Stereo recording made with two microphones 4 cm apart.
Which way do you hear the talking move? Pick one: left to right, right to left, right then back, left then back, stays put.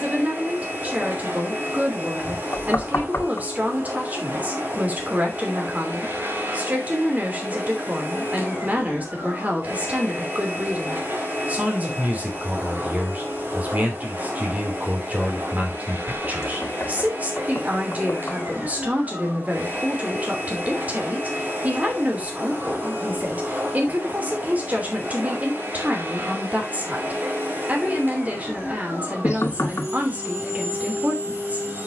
stays put.